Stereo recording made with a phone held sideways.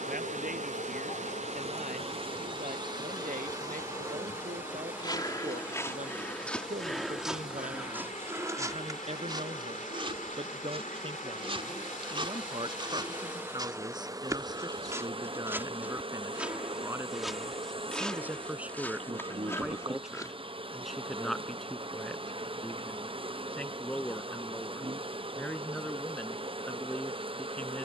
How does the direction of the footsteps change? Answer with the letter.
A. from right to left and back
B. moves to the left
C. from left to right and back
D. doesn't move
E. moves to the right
C.